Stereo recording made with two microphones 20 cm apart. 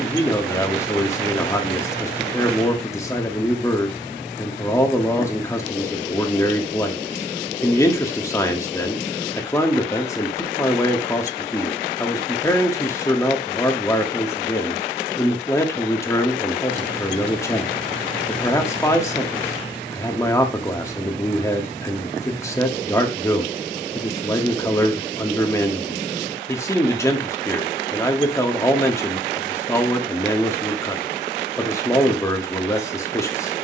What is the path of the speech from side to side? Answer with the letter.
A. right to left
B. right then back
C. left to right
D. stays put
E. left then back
D.